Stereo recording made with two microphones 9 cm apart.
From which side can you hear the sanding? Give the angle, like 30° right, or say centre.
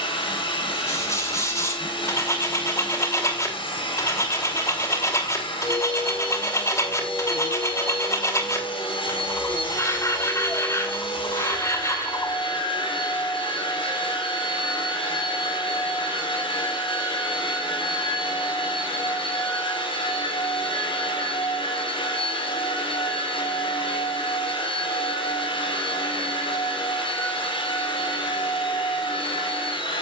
30° left.